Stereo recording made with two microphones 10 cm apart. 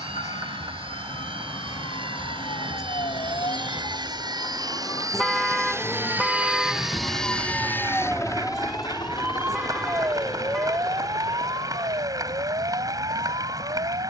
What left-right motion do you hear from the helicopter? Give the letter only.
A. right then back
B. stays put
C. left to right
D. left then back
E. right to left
E.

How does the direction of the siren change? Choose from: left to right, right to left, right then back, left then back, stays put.
left to right.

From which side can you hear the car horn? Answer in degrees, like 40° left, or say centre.
centre.